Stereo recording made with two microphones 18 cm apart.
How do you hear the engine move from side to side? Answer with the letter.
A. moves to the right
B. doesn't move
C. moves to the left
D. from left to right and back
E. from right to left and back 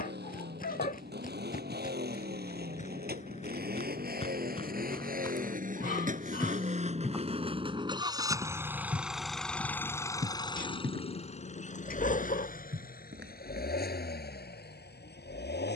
C.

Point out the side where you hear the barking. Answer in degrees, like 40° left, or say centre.
50° left.